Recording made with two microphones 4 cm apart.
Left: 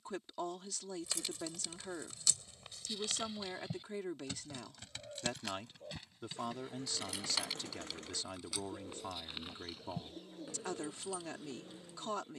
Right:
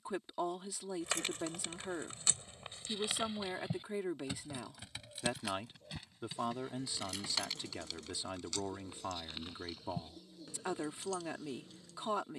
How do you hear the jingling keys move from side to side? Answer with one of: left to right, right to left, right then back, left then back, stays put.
right to left.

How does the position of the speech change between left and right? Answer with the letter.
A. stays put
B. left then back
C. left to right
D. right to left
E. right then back
A.